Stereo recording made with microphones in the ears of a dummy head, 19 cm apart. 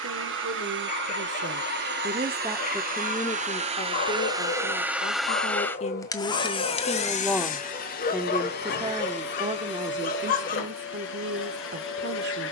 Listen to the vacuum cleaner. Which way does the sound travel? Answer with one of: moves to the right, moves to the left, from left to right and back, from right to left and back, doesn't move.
moves to the left.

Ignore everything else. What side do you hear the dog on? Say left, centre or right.
left.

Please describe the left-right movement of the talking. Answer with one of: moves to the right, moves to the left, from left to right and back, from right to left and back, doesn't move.
from right to left and back.